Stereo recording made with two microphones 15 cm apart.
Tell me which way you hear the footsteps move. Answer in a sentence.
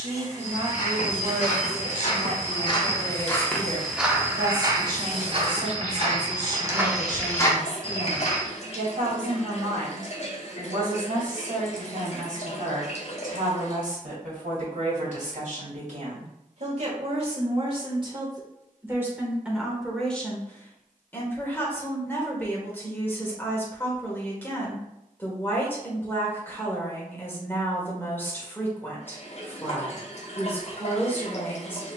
In this clip you hear the footsteps move from left to right and back again.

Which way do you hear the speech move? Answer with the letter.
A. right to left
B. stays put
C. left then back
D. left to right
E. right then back
A.